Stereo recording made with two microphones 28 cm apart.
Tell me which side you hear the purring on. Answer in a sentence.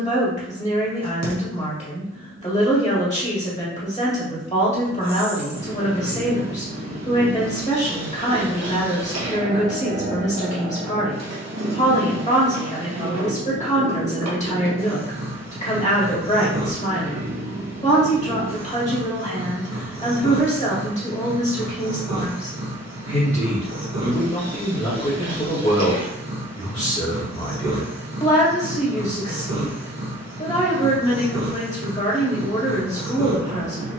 In this clip you hear the purring on the right.